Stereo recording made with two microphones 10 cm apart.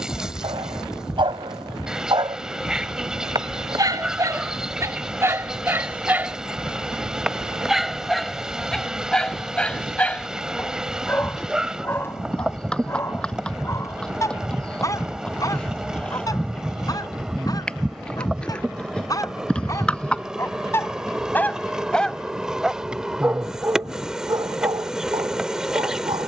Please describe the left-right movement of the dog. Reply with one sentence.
In this clip you hear the dog move from right to left and back again.